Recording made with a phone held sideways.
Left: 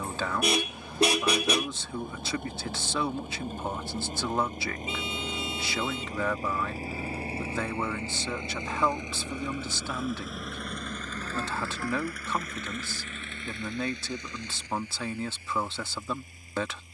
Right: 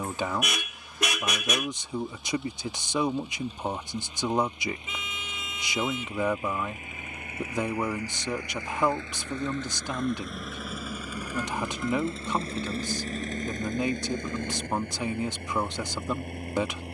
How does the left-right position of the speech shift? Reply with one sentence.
In this clip you hear the speech stay put.